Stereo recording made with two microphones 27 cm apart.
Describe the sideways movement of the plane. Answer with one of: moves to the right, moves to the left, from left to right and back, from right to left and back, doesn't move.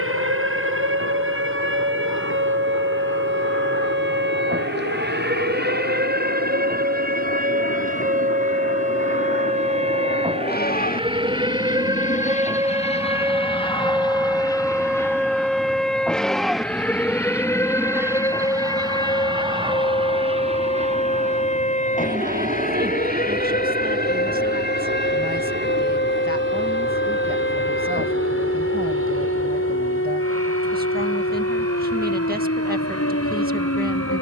moves to the right.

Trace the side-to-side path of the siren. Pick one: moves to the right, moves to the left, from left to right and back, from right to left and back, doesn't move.
moves to the left.